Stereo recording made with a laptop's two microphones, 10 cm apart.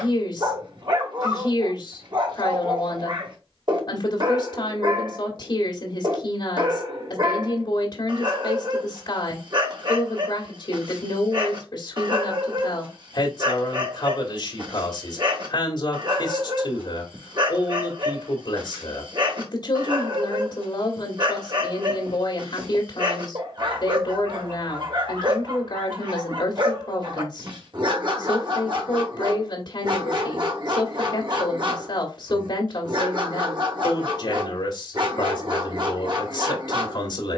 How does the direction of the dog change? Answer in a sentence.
You can hear the dog stay put.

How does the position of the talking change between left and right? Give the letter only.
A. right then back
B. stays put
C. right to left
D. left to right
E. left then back
B.